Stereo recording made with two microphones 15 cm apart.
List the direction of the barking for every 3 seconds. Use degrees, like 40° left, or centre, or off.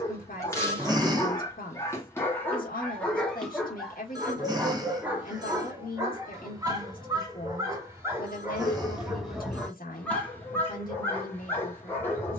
20° left, 10° right, 20° right, 10° left.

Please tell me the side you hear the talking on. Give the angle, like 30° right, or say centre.
70° left.